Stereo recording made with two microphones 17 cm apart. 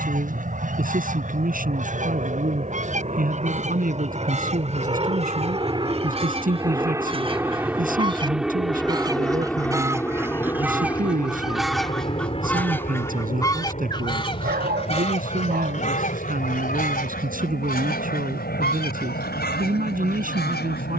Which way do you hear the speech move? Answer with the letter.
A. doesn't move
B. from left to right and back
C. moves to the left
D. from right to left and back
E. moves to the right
A.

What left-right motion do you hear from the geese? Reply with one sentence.
You can hear the geese move from right to left.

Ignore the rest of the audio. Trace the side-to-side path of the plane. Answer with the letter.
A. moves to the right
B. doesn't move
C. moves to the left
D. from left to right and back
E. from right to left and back
C.